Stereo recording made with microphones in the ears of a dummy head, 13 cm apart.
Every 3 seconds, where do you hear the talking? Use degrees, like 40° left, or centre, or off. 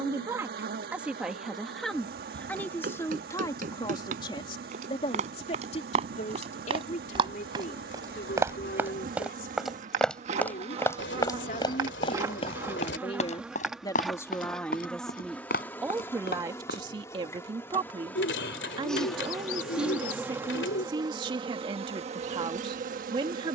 centre, 30° left, 50° left, 50° left, 30° left, 20° right, 30° right, 30° right.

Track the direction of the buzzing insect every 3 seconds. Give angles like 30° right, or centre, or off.
70° right, 70° right, 60° right, 40° right, 10° right, 10° left, centre, 40° right.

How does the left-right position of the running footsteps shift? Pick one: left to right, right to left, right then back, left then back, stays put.
right to left.